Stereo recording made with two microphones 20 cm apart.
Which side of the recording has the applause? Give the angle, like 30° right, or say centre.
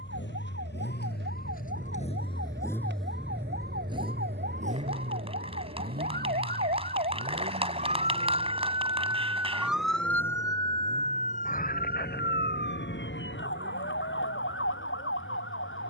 30° right.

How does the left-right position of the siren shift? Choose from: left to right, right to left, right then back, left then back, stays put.
right to left.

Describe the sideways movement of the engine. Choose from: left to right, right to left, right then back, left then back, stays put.
left to right.